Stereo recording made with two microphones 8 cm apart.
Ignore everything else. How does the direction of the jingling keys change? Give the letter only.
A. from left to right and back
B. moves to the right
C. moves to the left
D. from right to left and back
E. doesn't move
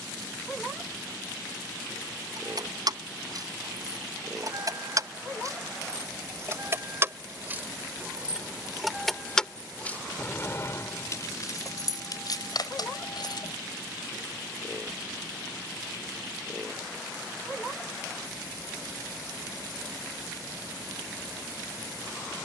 C.